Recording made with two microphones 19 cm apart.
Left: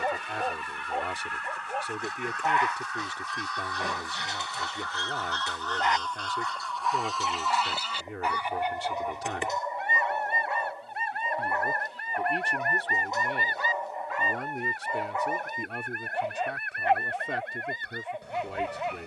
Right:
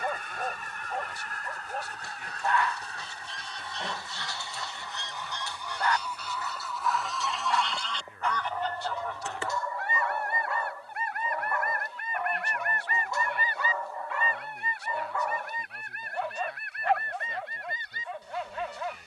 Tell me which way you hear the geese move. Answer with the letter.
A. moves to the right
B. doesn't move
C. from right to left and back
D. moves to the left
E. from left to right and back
D.